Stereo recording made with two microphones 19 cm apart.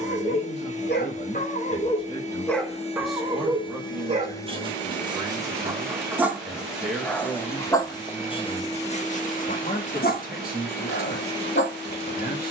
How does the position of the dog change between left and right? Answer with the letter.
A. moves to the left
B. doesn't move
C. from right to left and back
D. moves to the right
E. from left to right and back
E.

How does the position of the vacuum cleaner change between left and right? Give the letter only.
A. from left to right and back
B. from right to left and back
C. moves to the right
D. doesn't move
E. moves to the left
A.